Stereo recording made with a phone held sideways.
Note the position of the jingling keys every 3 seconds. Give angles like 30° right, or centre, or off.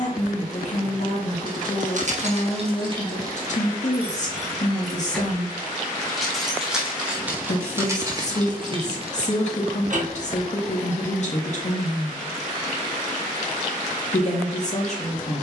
50° right, 10° right, 20° right, 60° right, off.